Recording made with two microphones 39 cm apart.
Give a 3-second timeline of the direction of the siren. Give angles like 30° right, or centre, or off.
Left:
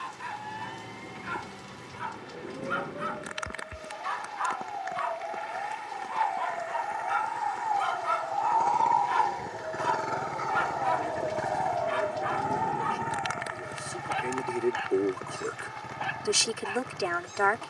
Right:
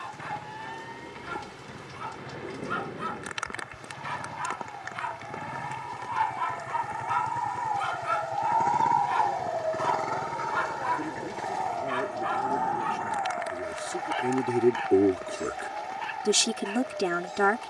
80° left, 70° left, 50° left, 10° right, 50° right, 70° right.